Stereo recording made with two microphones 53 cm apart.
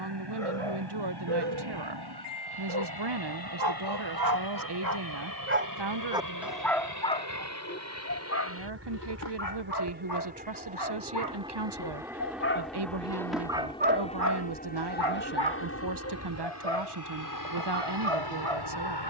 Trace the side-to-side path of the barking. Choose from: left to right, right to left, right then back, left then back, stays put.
left then back.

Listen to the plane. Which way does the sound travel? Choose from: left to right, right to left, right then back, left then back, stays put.
right to left.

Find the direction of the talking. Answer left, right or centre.
right.